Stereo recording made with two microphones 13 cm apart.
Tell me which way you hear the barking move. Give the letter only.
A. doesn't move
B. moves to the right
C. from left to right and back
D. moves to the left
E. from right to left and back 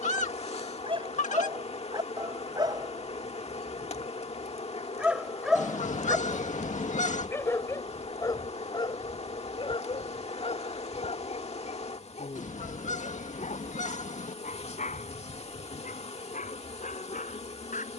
D.